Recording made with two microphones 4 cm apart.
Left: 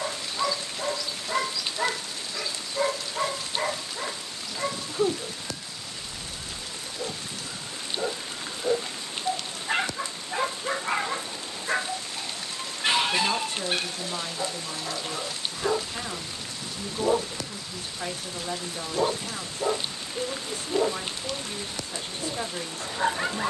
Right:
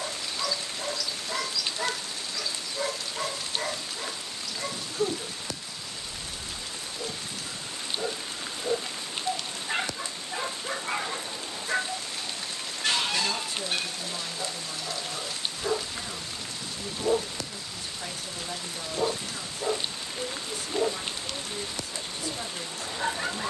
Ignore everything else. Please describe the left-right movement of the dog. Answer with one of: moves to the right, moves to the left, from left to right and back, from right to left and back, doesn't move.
doesn't move.